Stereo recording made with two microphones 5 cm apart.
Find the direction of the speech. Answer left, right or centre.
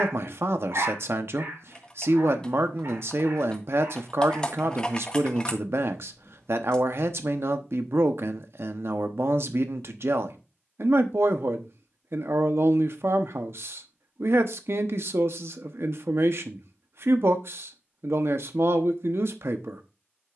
right.